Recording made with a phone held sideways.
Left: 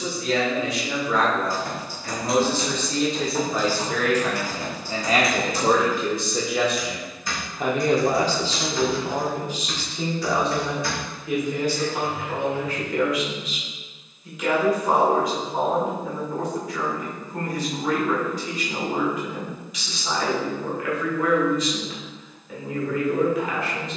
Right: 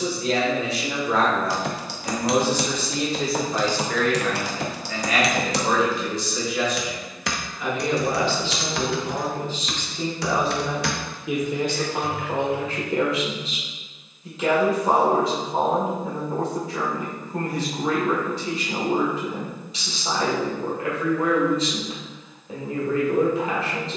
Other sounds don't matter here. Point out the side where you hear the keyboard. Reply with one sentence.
In this clip you hear the keyboard on the right.